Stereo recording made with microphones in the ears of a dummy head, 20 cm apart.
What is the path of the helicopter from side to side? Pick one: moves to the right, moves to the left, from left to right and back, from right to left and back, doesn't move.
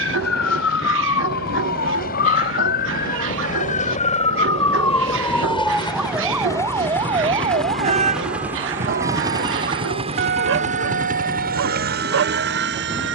moves to the right.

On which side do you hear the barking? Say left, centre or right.
right.